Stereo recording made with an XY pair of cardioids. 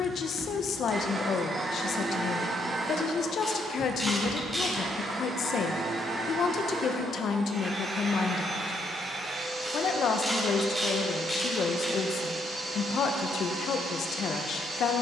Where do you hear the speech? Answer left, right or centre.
left.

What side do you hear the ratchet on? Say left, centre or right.
centre.